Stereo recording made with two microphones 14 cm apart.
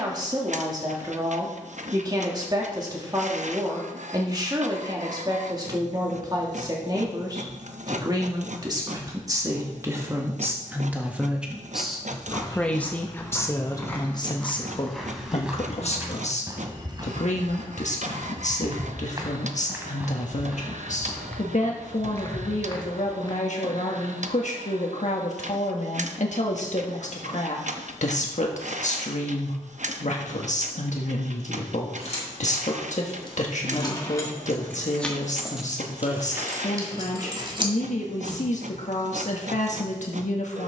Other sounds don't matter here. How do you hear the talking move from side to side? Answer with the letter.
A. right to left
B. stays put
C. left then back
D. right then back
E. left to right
A.